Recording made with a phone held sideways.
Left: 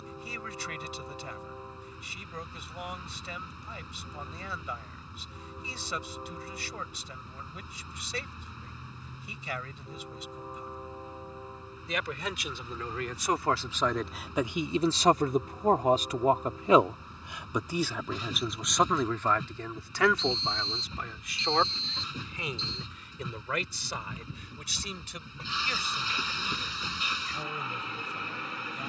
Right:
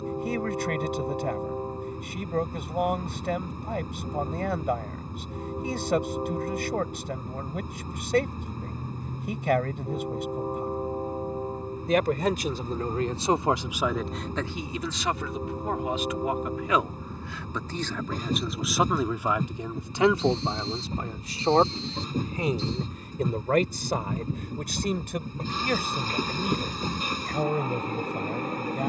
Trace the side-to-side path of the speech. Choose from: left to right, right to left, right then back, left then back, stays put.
left then back.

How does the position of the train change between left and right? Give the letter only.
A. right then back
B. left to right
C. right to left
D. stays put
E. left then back
D.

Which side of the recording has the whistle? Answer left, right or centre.
left.